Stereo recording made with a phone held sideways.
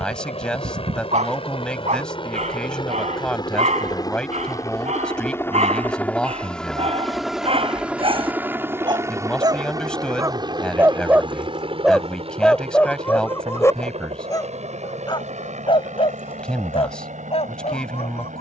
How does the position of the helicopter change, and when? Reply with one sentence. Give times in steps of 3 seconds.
In this clip you hear the helicopter on the left from 0 s, in the centre from 6 s and on the right from 9 s.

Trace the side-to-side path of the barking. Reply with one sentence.
You can hear the barking move to the left.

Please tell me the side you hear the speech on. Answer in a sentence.
You can hear the speech in the centre.